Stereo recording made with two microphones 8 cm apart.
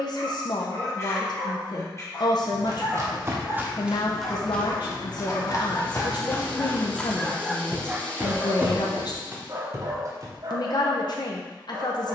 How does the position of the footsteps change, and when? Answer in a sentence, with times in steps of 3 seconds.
In this clip you hear the footsteps on the right from 0 s, in the centre from 3 s and on the right from 9 s.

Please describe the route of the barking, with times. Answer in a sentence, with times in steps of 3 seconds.
You can hear the barking on the left from 0 s, in the centre from 6 s and on the right from 9 s.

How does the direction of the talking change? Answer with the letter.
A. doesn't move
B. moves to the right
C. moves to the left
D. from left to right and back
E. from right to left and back
A.